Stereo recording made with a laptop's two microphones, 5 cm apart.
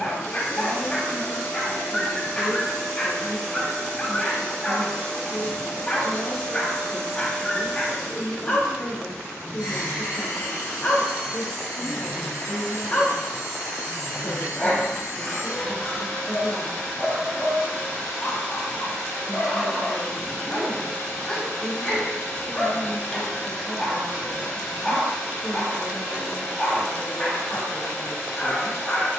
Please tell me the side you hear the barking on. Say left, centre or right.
left.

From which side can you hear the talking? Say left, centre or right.
left.